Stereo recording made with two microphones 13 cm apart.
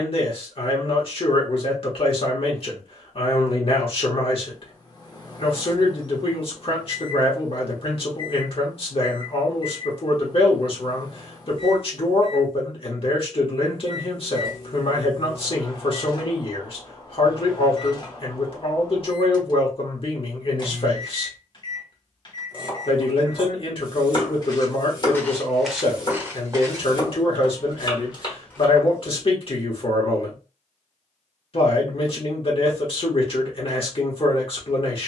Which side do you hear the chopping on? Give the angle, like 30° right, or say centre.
40° left.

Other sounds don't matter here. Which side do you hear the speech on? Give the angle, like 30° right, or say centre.
50° left.